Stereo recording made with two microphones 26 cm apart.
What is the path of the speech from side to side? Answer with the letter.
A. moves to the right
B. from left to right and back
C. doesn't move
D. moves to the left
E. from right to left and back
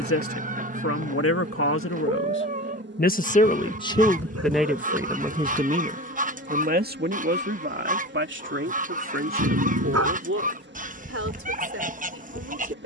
A.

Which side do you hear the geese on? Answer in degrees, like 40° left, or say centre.
30° right.